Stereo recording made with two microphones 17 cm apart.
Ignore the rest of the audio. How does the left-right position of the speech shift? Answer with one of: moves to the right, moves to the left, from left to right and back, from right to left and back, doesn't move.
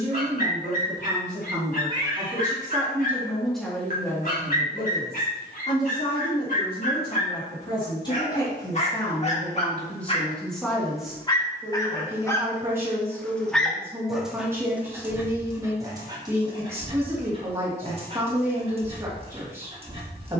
from right to left and back.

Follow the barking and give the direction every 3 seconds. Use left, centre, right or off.
left, left, left, left, centre, right, right.